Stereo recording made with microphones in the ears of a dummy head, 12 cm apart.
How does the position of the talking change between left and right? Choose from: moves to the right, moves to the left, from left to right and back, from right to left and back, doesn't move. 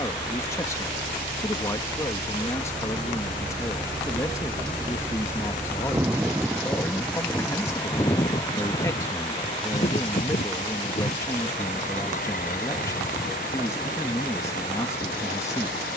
doesn't move.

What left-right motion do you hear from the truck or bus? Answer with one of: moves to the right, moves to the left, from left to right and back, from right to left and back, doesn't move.
moves to the left.